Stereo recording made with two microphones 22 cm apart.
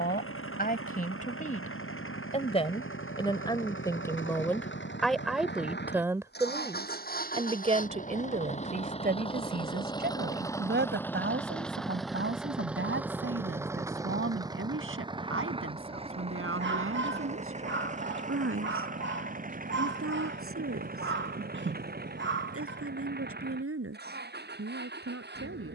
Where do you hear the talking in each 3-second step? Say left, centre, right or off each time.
left, centre, right, right, right, right, right, right, right.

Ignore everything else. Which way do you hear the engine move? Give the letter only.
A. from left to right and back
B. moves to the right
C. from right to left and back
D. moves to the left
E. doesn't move
B.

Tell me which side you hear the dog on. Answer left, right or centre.
right.